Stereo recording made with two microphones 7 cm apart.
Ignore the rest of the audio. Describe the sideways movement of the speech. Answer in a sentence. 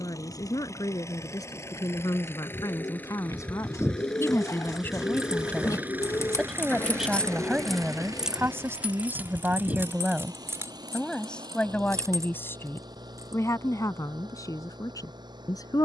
In this clip you hear the speech go right and come back.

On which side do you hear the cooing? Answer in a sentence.
In this clip you hear the cooing on the left.